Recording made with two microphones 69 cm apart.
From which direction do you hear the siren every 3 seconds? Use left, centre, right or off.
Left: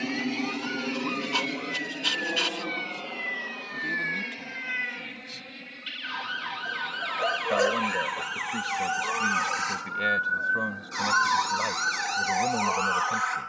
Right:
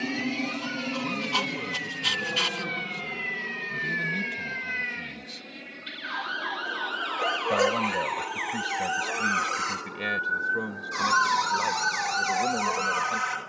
left, left, left, centre, right.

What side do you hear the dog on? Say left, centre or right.
right.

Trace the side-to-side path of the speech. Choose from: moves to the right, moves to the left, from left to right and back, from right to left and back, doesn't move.
moves to the left.